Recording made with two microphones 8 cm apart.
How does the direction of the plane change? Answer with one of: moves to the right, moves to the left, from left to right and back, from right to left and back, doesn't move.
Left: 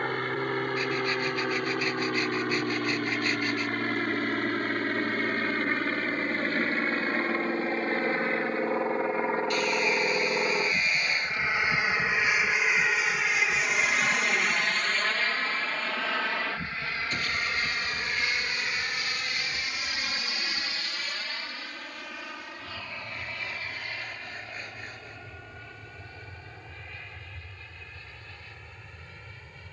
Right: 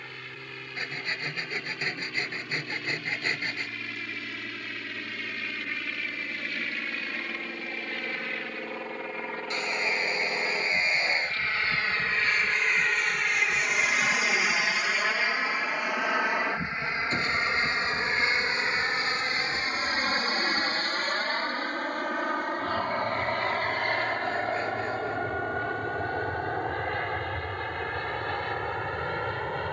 moves to the right.